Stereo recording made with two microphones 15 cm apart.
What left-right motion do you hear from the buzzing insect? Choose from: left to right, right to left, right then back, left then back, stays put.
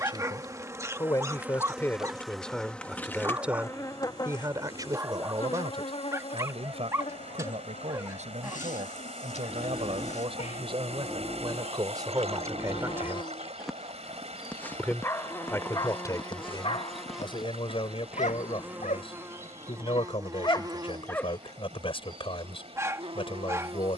left then back.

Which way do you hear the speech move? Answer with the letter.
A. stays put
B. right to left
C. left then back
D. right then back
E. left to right
D.